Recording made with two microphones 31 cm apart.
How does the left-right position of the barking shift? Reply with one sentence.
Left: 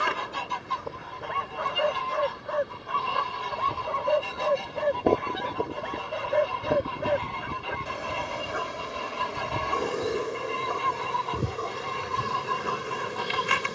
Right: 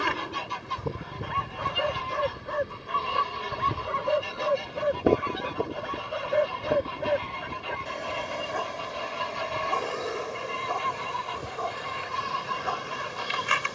In this clip you hear the barking move from right to left.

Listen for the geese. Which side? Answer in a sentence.
In this clip you hear the geese on the left.